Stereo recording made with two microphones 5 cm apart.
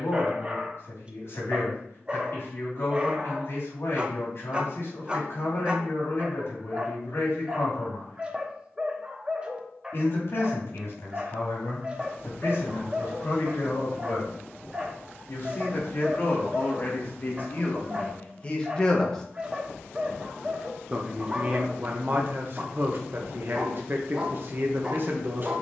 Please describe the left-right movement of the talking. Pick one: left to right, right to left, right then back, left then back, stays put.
left to right.